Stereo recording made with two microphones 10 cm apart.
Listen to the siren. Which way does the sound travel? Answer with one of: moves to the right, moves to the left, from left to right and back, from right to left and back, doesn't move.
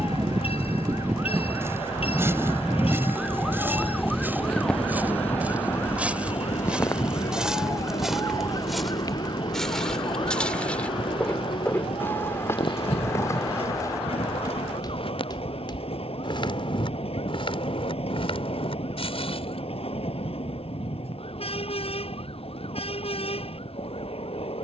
moves to the left.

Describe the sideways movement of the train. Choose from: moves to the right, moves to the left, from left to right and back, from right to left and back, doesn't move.
doesn't move.